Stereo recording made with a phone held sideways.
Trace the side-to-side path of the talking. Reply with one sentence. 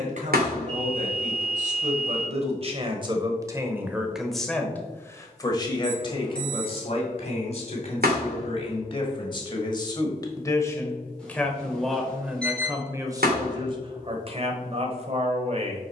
You can hear the talking move from right to left and back again.